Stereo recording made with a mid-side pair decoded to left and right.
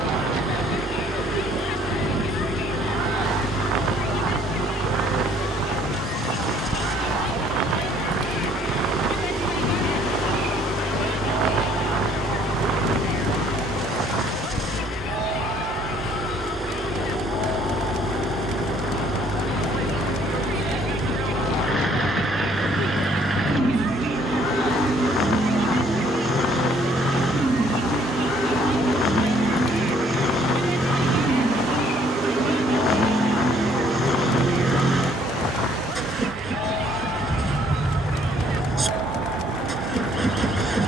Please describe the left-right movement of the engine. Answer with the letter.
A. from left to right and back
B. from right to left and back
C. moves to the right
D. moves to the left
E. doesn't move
E.